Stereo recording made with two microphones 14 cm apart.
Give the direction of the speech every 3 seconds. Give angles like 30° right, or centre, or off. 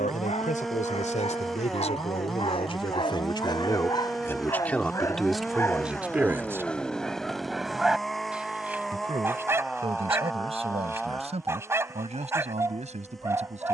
50° left, 10° left, 20° right, 40° right, 50° right.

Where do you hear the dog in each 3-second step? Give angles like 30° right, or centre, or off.
50° left, 30° left, centre, 20° right, 20° right.